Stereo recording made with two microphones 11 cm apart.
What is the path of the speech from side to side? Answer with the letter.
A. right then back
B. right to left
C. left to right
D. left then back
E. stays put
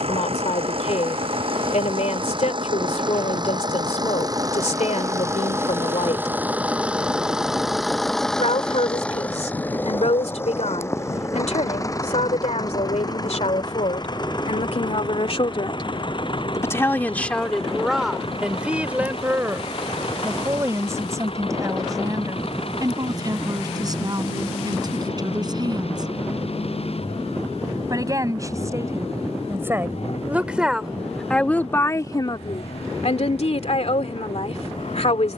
A.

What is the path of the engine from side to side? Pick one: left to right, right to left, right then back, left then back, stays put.
right to left.